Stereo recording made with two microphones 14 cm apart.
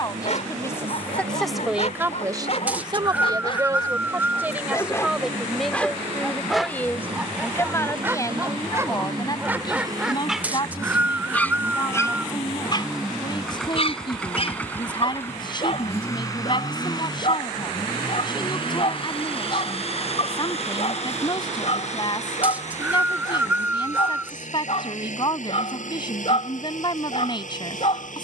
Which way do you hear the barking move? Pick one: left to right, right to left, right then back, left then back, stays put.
right then back.